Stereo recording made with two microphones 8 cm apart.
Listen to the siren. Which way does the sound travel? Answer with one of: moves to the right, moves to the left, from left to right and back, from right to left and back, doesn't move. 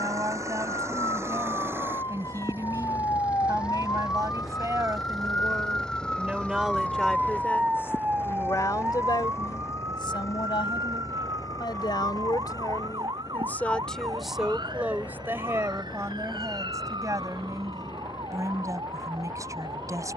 moves to the right.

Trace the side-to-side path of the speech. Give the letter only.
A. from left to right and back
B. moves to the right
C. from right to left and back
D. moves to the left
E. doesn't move
C.